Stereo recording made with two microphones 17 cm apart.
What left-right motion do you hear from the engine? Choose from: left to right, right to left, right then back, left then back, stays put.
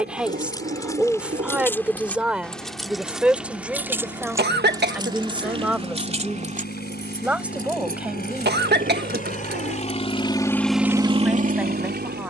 left to right.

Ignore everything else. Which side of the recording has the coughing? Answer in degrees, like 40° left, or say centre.
70° right.